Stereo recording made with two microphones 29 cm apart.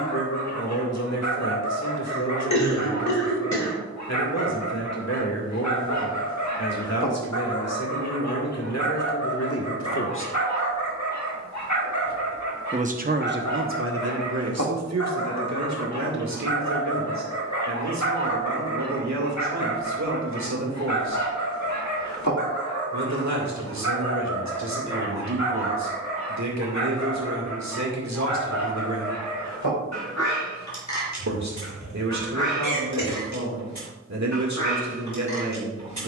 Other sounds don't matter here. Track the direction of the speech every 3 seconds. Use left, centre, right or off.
left, left, left, left, right, right, right, right, right, right, right, right.